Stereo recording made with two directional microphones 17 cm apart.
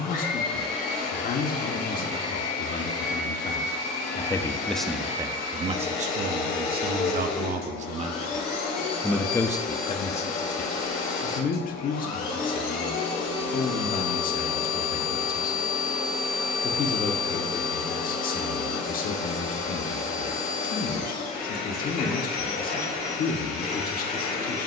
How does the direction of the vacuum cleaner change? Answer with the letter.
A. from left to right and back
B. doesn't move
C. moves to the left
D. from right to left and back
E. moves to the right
B.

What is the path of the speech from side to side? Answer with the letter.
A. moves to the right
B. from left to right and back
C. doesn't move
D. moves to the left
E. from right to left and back
B.